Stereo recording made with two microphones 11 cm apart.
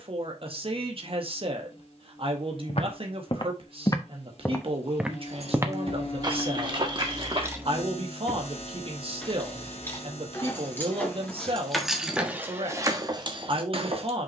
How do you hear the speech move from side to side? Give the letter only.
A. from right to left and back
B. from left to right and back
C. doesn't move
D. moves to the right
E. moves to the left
C.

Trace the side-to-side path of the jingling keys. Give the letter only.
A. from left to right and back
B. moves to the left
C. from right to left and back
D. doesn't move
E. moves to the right
C.